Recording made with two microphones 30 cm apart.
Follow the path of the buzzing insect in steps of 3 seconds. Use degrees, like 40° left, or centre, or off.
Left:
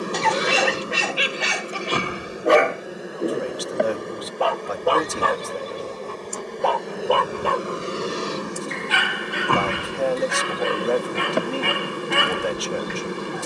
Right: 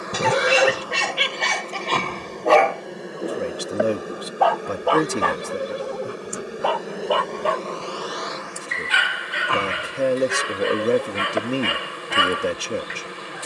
20° left, 10° right, 20° left, 60° left, 60° left.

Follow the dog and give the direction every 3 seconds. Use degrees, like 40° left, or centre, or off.
10° left, 40° left, 60° left, 60° left, 60° left.